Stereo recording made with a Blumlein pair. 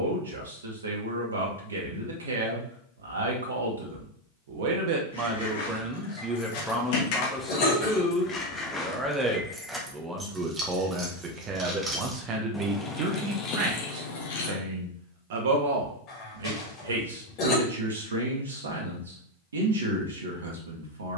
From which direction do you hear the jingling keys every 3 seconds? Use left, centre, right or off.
off, left, left, centre, left, off, off.